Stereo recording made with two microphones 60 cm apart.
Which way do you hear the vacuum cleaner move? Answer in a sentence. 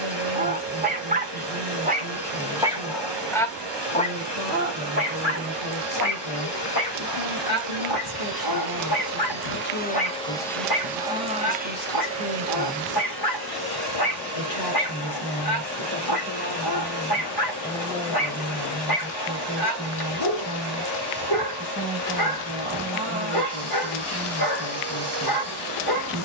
In this clip you hear the vacuum cleaner move to the right.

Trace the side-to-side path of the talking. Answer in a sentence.
In this clip you hear the talking move to the right.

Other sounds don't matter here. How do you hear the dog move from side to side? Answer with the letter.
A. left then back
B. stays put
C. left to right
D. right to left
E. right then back
D.